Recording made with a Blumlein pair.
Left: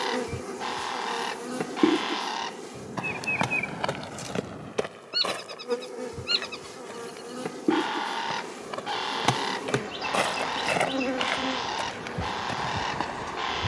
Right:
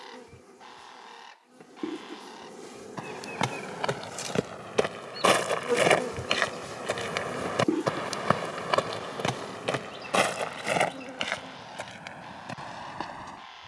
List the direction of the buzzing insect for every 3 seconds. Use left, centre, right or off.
left, centre, centre, left, left.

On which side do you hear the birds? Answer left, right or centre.
left.